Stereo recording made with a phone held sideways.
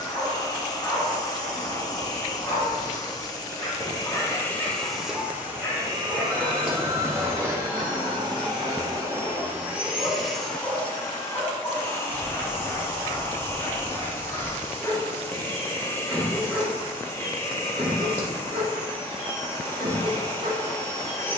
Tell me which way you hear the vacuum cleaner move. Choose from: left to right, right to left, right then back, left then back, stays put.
right then back.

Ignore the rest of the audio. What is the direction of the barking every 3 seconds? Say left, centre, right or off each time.
left, left, left, left, left, centre, right.